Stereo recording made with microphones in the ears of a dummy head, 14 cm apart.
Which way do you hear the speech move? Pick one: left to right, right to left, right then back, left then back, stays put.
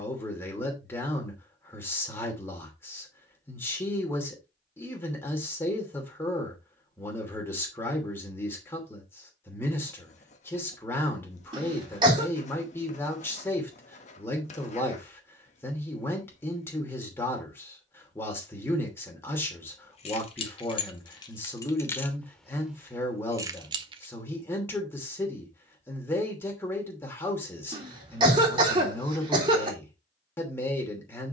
stays put.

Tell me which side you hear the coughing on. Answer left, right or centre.
right.